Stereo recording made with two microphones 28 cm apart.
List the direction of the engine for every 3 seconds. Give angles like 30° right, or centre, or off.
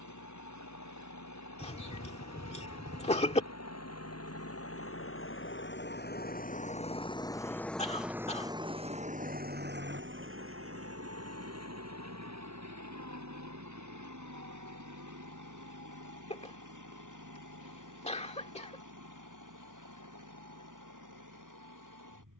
70° left, 50° left, 10° left, 40° right, 60° right, 70° right, 80° right, 80° right.